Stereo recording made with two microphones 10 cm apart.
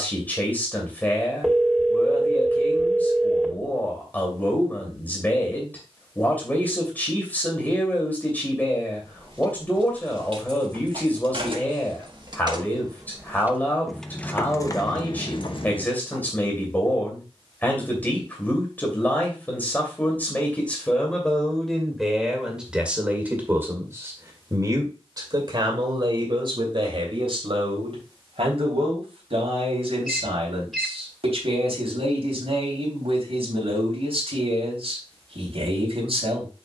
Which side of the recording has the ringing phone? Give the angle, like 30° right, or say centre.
centre.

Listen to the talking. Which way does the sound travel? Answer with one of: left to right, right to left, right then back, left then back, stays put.
left to right.